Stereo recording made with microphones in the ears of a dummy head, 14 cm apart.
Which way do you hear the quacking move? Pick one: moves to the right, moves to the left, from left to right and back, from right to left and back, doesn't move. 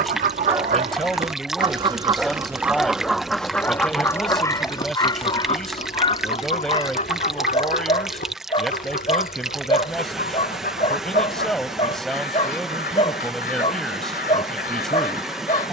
moves to the left.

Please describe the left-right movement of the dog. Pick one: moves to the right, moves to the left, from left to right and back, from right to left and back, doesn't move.
moves to the left.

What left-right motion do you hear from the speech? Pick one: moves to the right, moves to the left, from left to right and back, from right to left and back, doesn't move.
doesn't move.